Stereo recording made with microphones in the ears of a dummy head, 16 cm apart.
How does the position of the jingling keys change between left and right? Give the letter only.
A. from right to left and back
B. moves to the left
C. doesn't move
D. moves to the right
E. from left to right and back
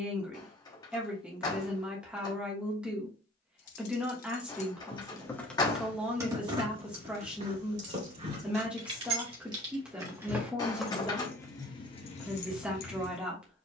E.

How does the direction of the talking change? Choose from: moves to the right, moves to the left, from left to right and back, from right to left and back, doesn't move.
doesn't move.